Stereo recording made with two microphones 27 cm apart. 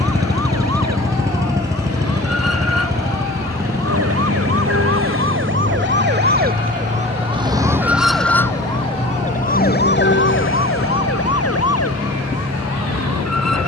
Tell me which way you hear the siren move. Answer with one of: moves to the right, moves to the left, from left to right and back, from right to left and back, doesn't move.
moves to the left.